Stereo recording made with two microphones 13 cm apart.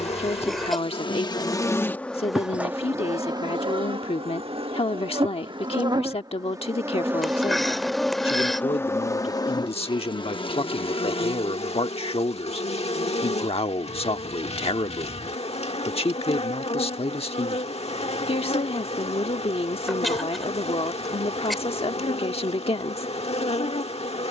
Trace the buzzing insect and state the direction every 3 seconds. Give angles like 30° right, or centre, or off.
30° left, 40° right, 10° right, 50° left, 60° left, 60° left, 60° left, 60° left.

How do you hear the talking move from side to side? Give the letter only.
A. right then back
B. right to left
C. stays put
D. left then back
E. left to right
C.